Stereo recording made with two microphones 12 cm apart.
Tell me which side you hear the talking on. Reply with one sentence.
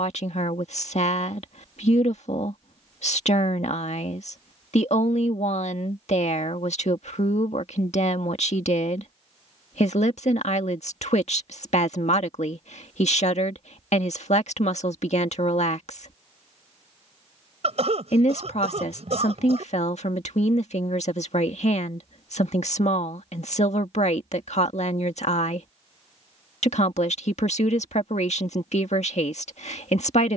You can hear the talking on the left.